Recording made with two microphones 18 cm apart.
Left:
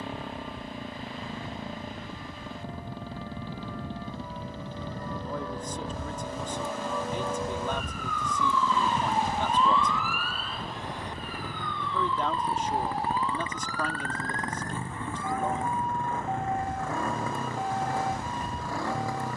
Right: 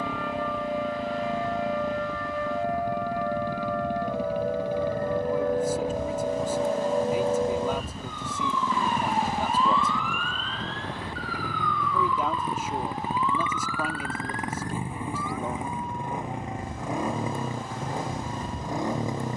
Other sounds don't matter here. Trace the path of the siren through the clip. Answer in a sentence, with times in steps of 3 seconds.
You can hear the siren on the right from 0 s, in the centre from 9 s and on the left from 12 s.